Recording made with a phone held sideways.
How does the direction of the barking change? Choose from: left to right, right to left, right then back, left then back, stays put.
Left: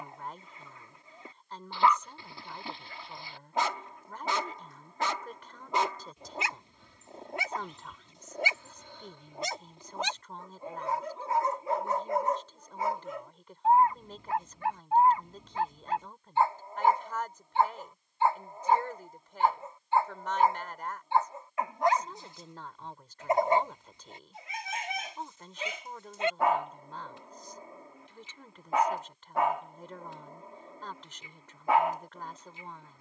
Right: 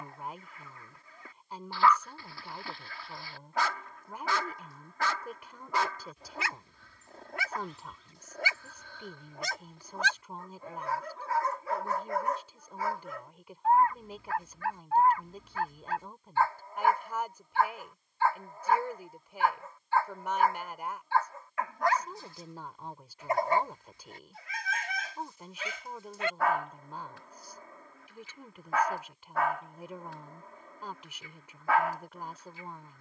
stays put.